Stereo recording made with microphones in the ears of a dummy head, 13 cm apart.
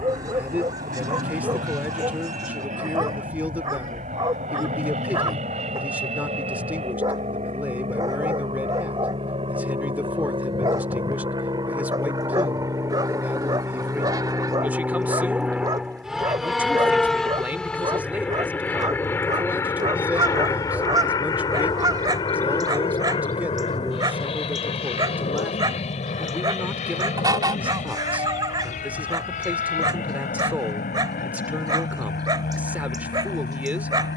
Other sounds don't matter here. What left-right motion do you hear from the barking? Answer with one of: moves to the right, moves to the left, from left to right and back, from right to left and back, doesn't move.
doesn't move.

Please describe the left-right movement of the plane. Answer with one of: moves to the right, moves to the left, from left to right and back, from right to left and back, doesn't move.
moves to the left.